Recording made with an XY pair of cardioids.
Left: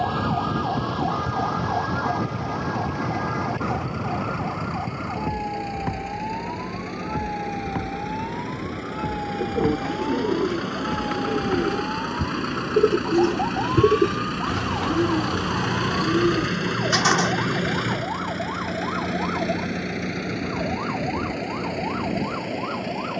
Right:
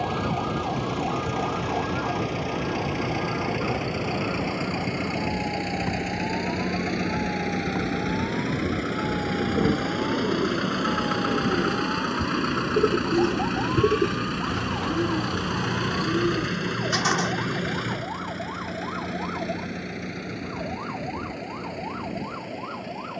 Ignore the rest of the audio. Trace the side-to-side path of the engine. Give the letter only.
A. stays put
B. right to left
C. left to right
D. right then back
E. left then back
B.